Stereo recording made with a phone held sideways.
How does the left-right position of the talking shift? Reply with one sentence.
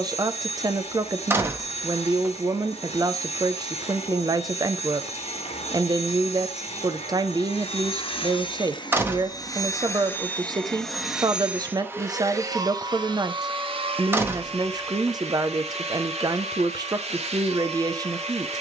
In this clip you hear the talking stay put.